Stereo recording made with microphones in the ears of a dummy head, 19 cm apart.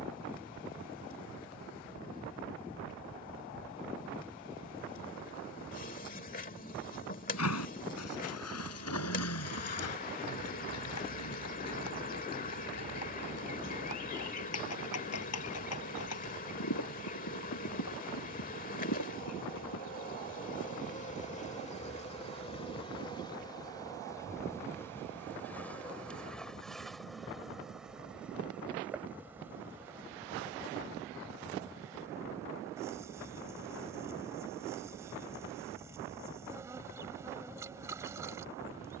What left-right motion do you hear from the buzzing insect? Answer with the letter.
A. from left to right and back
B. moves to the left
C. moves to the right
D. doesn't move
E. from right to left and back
C.